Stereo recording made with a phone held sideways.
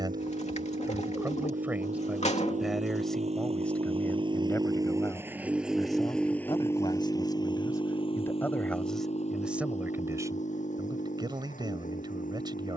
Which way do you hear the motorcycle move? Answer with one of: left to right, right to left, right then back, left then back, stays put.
right to left.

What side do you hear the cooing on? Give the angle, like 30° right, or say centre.
50° left.